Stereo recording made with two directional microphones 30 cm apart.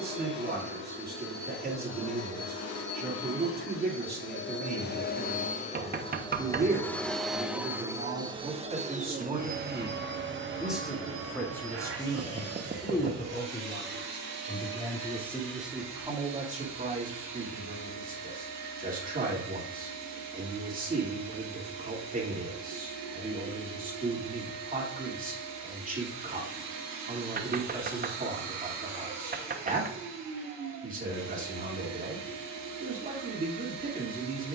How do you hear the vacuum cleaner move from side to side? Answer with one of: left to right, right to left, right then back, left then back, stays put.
left to right.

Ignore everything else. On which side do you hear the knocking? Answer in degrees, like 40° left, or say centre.
30° right.